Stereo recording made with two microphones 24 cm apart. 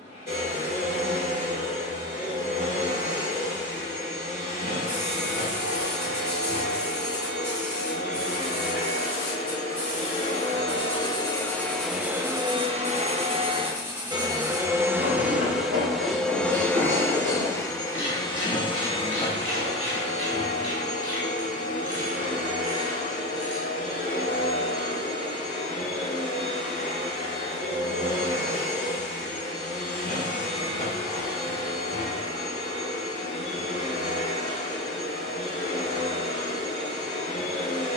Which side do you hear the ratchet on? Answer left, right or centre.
right.